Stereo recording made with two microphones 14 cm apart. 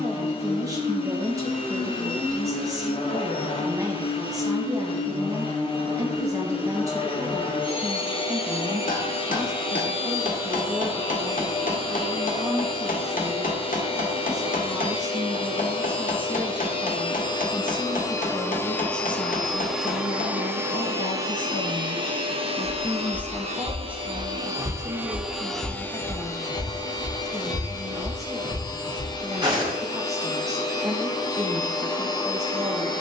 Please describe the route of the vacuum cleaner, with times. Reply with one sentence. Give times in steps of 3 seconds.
In this clip you hear the vacuum cleaner on the left from 0 s, in the centre from 18 s, on the right from 21 s, in the centre from 24 s and on the left from 27 s.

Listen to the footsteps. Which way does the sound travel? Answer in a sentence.
You can hear the footsteps move from left to right.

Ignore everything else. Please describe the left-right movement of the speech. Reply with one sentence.
In this clip you hear the speech move from right to left and back again.